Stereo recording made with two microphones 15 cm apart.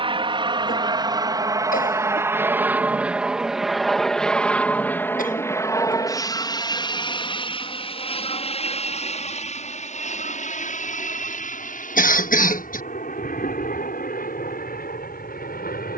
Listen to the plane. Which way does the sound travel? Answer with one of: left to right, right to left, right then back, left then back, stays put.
right to left.